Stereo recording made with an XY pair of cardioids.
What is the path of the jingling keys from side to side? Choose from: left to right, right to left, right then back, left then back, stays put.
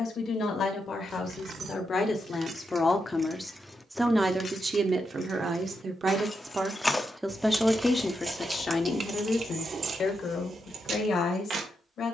left then back.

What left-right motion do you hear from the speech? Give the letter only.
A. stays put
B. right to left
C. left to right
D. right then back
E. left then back
D.